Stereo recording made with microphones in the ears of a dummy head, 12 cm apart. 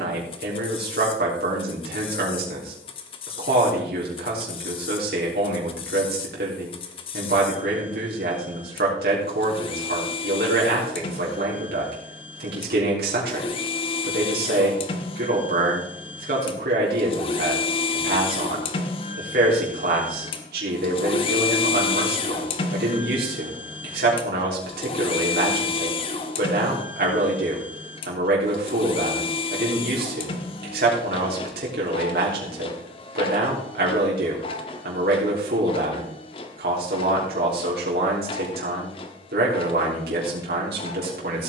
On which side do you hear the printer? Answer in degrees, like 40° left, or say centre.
40° left.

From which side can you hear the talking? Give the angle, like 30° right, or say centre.
80° right.